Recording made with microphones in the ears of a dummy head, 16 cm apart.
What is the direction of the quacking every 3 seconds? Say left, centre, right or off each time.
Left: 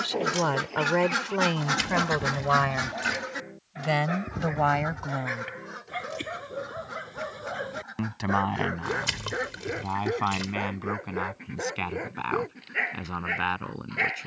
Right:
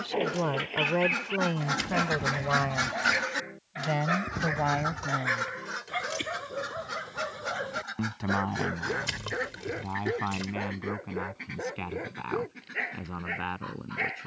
left, right, right, right, right.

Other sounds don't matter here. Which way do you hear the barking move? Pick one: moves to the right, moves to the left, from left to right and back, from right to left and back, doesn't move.
moves to the left.